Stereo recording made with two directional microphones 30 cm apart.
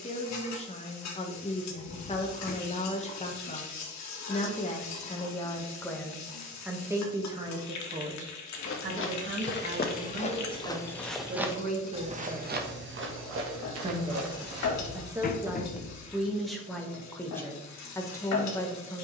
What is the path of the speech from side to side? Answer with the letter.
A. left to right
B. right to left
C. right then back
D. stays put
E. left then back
C.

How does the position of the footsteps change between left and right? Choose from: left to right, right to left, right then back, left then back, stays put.
left to right.